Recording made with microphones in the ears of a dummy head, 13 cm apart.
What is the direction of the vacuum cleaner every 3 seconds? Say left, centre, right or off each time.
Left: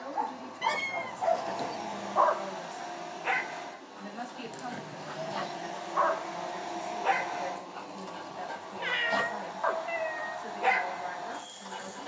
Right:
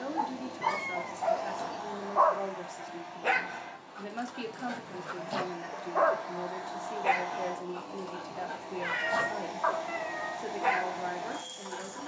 centre, left, centre, right.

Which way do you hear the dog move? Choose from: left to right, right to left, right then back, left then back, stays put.
right then back.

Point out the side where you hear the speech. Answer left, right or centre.
right.